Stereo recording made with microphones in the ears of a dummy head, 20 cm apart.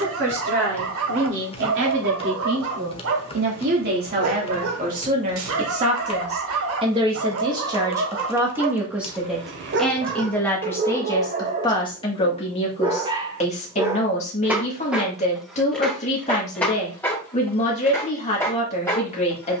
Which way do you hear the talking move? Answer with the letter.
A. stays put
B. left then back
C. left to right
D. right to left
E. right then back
D.